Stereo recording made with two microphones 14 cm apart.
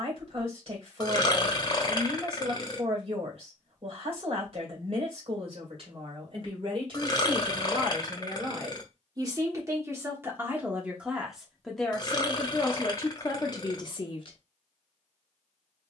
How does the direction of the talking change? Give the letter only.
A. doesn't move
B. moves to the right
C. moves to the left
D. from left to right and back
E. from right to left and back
C.